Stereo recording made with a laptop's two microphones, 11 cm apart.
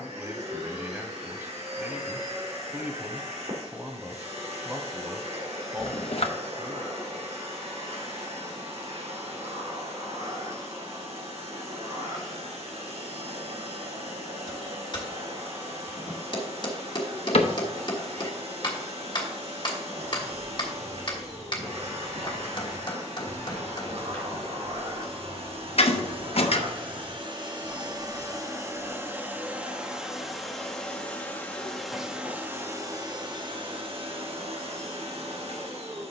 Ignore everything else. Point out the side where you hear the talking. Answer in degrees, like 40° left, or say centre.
20° right.